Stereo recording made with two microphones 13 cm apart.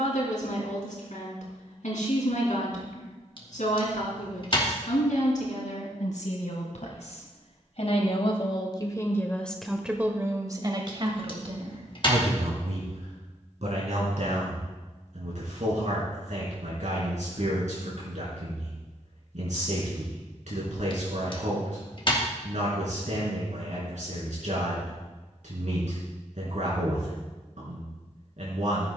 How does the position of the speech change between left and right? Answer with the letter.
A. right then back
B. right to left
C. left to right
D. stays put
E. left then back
C.